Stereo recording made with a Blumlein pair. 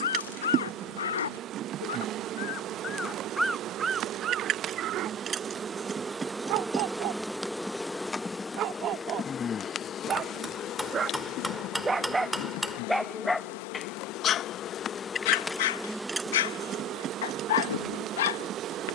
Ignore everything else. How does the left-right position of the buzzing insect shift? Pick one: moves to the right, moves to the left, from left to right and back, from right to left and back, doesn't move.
from right to left and back.